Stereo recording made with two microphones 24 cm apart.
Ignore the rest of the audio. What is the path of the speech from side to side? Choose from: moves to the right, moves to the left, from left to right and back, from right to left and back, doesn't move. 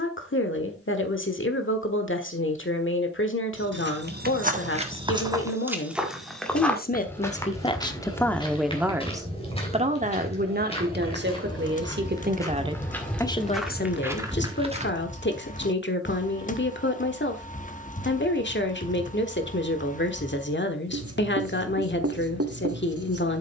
from left to right and back.